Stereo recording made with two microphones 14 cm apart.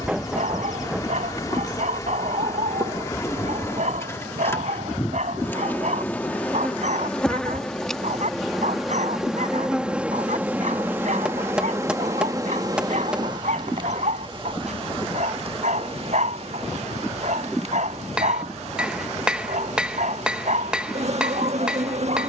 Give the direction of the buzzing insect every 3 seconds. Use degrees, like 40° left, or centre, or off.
30° left, 20° left, 10° left, 10° right, 30° right, 50° right, 60° right, 60° right.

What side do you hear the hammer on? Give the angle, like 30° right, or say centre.
10° right.